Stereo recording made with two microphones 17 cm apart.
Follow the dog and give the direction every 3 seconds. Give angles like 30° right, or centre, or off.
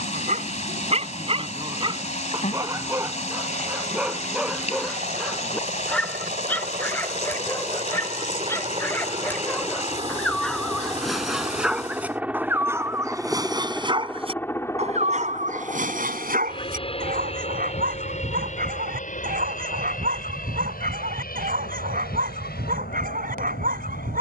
30° right, centre, 10° left, centre, 20° right, 60° right, 60° right, 60° right.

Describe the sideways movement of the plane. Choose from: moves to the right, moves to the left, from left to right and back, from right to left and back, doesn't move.
moves to the left.